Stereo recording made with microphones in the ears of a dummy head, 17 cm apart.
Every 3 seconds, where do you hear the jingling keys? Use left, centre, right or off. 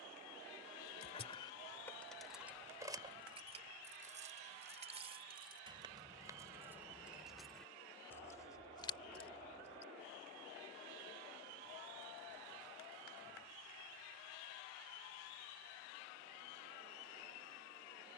centre, right, centre, left, off, off.